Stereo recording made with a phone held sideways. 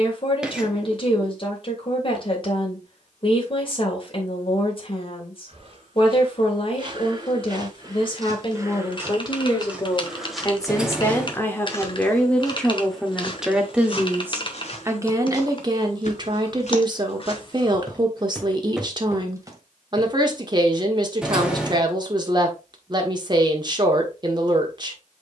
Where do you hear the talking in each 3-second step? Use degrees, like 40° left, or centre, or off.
40° left, 40° left, 40° left, 20° left, centre, 30° right, 30° right, 30° right, 30° right.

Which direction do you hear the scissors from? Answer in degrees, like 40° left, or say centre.
10° right.